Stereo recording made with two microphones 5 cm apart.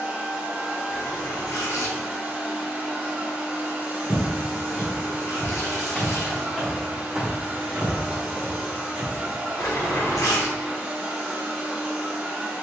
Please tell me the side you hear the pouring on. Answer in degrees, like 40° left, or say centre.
80° left.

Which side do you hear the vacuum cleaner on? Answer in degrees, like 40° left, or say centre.
20° right.